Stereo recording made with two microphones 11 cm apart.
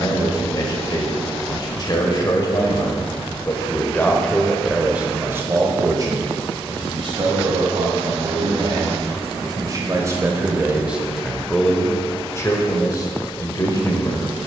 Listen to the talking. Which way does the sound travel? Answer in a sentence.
You can hear the talking move from left to right and back again.